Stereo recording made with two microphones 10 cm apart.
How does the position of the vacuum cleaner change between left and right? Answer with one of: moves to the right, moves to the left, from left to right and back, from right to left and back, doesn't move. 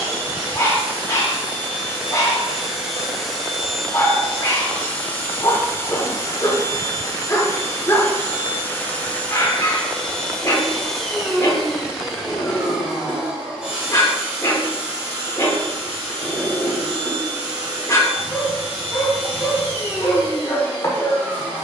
from right to left and back.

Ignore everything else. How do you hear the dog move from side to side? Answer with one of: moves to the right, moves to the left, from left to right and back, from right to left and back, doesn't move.
doesn't move.